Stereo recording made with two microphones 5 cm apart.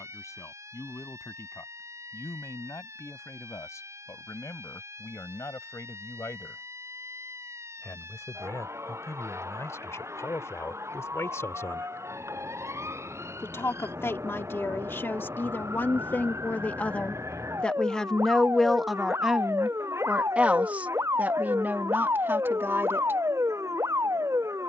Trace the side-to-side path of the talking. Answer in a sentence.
In this clip you hear the talking move to the right.